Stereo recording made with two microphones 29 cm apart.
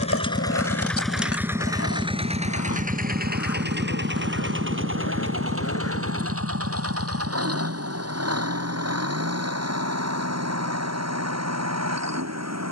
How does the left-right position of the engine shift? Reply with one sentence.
In this clip you hear the engine move to the right.